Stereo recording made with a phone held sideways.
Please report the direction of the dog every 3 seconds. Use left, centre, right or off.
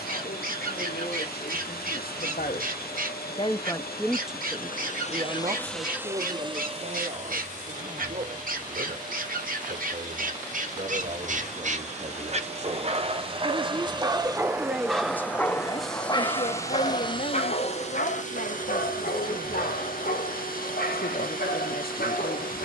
right, right, right, right, right, left, left, left.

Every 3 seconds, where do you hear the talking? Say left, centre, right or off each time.
left, centre, right, right, right, left, left, left.